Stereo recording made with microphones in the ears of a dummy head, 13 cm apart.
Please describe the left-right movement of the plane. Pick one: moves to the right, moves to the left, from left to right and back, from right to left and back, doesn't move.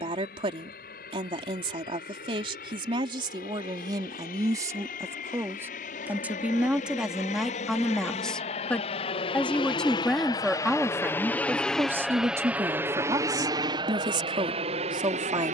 moves to the right.